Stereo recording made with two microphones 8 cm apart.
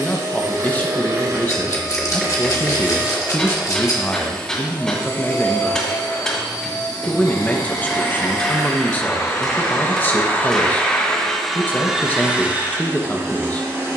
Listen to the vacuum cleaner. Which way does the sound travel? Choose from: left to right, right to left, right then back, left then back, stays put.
left then back.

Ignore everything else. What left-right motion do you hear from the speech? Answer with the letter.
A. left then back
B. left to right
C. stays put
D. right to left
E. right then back
C.